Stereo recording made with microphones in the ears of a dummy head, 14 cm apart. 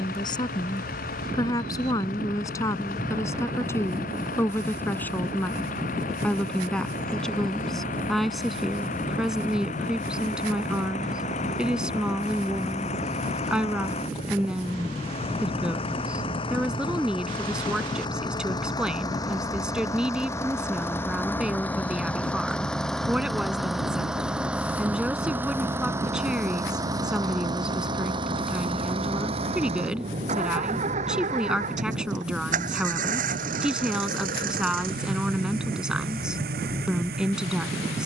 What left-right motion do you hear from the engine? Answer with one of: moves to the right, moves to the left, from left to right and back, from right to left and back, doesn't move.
moves to the right.